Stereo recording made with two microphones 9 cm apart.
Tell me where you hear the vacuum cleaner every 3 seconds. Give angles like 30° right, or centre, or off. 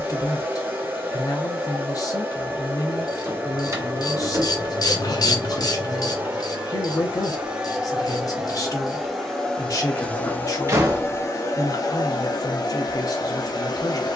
20° right, 20° right, 10° right, 20° left, 50° left.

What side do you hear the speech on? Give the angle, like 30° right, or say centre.
40° left.